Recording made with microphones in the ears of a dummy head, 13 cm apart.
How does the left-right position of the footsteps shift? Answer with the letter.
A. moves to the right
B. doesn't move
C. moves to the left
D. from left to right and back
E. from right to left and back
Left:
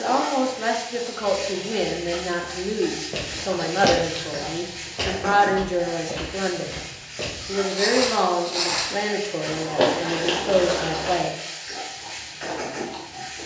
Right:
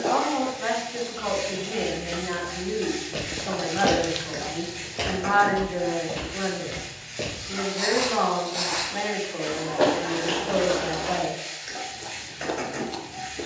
D.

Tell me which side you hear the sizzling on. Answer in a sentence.
In this clip you hear the sizzling on the right.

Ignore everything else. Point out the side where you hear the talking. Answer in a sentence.
In this clip you hear the talking on the left.